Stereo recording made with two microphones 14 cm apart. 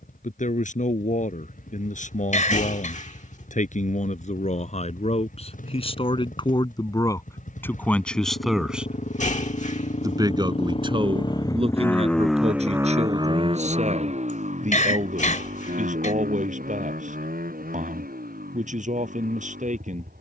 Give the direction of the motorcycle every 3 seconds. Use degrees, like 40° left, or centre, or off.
80° left, 70° left, 70° left, 40° left, 30° right, 70° right, 80° right.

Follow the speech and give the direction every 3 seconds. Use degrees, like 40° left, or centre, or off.
60° left, 50° left, 20° left, 40° right, 50° right, 60° right, 60° right.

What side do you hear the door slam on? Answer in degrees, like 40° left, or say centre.
60° left.